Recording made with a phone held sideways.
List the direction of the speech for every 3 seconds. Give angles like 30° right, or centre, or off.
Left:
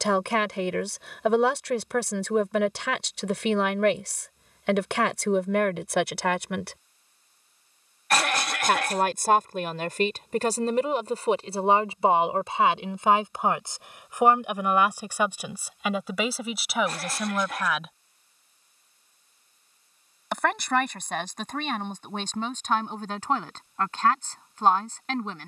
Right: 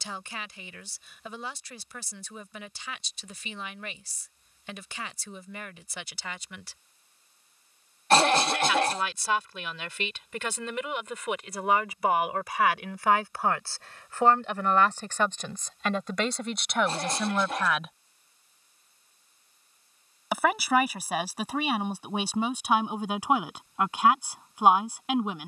80° left, 80° left, 70° left, 40° left, 20° left, 10° left, 10° right, 10° right, 10° right.